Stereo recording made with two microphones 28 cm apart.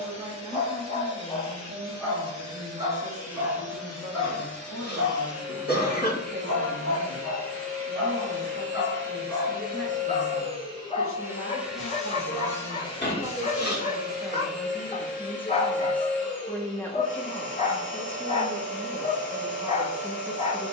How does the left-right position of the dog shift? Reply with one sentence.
In this clip you hear the dog go right and come back.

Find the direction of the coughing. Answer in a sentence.
You can hear the coughing on the left.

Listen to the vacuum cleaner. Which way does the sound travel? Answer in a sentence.
In this clip you hear the vacuum cleaner travel towards the left.